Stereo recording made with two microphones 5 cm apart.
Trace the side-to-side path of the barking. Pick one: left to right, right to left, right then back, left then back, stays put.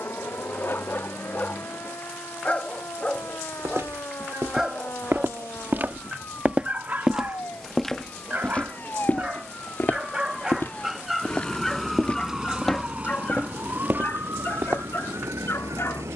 right then back.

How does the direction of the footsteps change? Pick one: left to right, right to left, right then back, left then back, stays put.
left then back.